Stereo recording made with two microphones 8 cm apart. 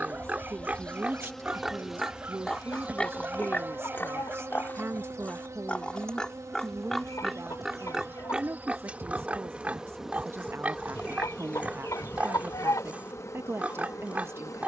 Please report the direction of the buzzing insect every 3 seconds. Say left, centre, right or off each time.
centre, right, right, centre, left.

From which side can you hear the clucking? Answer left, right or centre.
left.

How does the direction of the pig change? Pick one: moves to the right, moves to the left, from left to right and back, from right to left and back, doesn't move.
from right to left and back.